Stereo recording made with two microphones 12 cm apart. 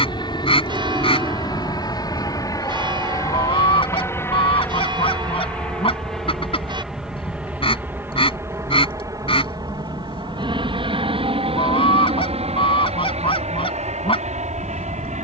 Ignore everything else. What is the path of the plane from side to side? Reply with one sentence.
You can hear the plane move to the right.